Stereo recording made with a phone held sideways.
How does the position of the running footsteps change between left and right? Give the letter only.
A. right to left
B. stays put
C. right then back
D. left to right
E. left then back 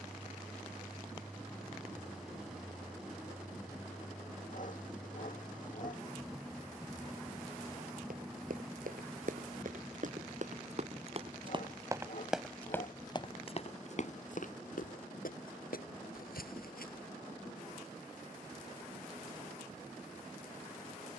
A.